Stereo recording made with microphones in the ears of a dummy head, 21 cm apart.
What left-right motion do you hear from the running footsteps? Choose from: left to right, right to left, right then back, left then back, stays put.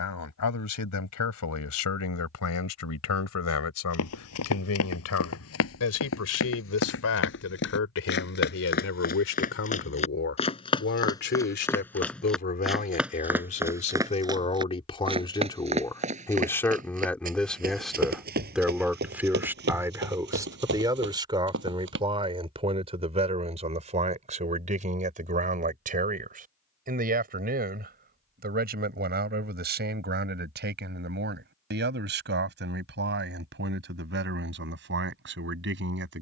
left to right.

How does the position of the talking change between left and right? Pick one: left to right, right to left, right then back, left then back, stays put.
left to right.